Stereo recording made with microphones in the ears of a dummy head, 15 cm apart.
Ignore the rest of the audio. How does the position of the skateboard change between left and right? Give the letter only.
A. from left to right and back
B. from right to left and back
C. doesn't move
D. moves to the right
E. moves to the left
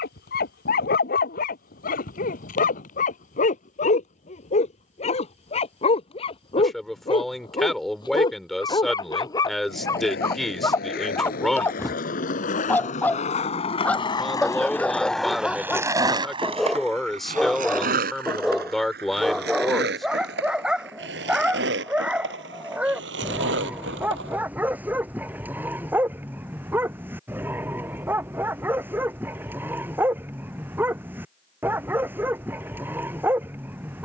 D.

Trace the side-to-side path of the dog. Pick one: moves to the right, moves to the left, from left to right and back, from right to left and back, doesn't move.
moves to the right.